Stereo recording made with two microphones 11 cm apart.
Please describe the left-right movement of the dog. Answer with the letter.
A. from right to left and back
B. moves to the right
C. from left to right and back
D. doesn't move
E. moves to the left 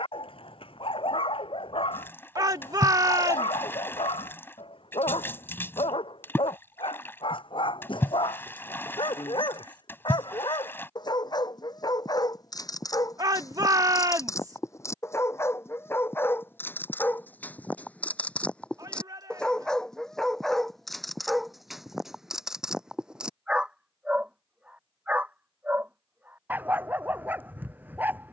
B.